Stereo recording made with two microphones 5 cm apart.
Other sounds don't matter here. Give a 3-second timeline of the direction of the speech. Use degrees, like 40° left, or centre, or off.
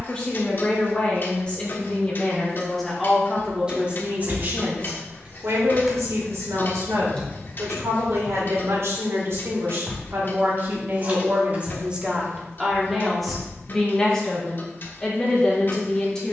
20° left, 30° right, 70° right, 40° right, centre, 20° left.